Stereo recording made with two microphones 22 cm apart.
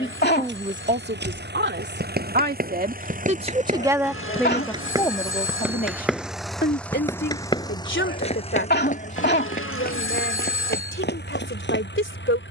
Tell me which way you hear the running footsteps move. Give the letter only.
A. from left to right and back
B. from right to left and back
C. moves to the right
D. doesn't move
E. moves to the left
E.